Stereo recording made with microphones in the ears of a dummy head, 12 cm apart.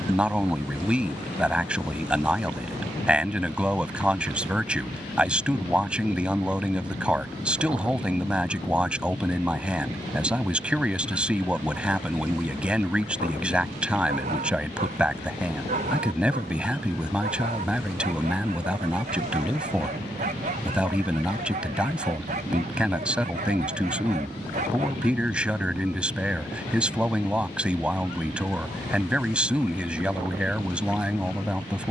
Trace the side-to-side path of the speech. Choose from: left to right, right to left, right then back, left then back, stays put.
stays put.